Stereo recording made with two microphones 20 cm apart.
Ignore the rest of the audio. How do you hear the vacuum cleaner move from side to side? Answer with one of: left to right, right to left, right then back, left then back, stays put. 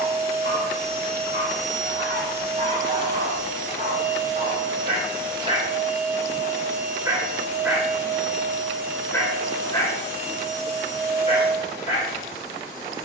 stays put.